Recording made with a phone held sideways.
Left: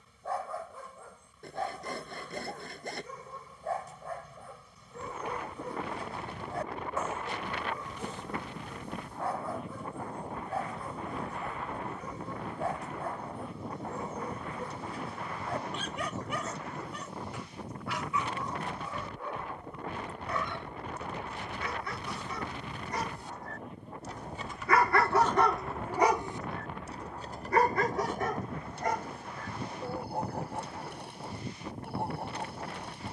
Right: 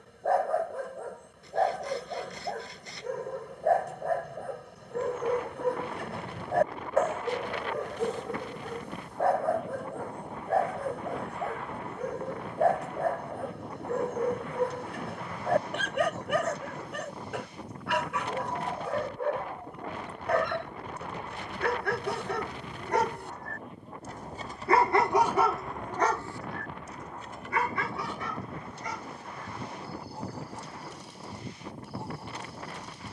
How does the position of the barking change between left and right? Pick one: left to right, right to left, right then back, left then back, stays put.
right to left.